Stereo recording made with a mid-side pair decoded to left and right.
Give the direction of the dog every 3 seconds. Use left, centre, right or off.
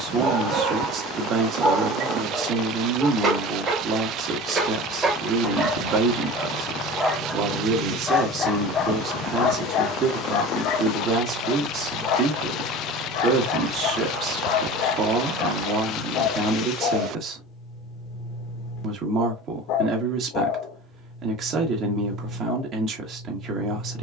right, right, centre, left, left, left, left, left.